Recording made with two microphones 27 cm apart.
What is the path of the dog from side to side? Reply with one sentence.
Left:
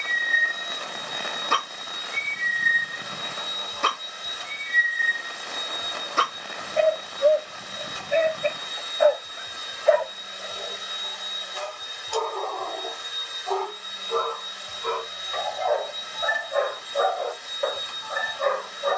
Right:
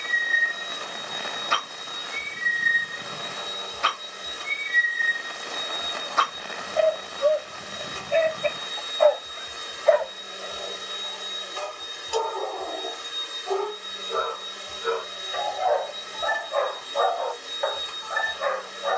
In this clip you hear the dog move from left to right and back again.